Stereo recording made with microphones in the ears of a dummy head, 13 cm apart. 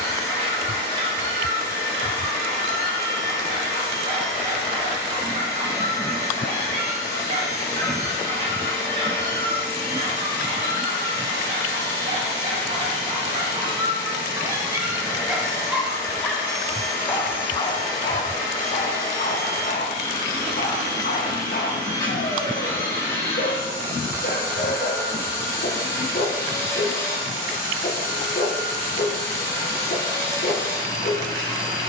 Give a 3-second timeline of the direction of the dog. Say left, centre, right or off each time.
right, right, right, right, right, centre, left, left, left, left, left.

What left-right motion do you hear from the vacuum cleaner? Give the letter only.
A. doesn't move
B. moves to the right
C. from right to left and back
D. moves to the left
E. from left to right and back
A.